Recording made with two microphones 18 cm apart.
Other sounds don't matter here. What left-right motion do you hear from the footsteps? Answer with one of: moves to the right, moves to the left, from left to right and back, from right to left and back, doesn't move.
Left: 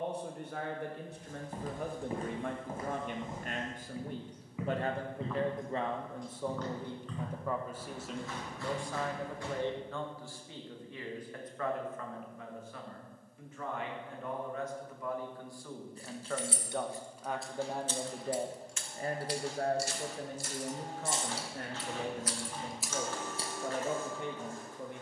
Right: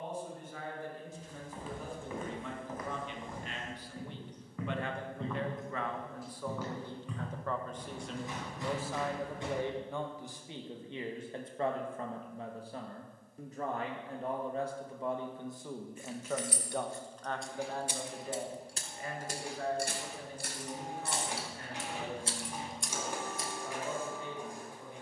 moves to the right.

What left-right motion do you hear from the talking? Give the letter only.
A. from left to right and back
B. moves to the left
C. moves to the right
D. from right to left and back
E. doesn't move
A.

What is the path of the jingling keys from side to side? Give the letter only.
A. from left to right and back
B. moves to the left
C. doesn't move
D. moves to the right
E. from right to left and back
A.